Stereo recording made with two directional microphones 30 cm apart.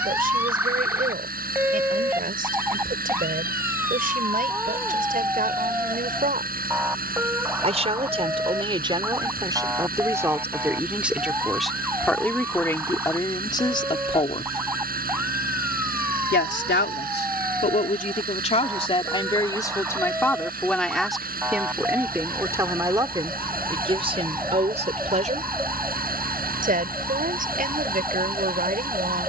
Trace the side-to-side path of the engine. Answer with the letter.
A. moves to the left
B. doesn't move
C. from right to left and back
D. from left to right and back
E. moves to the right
B.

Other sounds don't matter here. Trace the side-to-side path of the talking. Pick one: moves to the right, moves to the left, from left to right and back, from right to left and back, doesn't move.
from right to left and back.